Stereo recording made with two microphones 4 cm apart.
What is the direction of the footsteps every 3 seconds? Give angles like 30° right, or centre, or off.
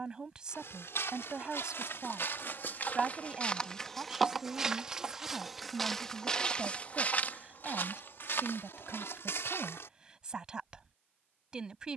70° left, centre, 40° left, 70° left.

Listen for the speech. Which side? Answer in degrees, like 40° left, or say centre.
20° right.